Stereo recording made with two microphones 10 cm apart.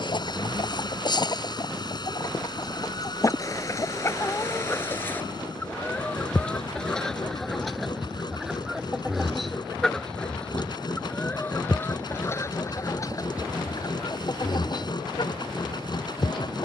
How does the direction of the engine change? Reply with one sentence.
In this clip you hear the engine stay put.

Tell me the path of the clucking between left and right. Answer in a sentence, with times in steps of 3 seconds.
In this clip you hear the clucking on the left from 0 s, in the centre from 6 s and on the left from 12 s.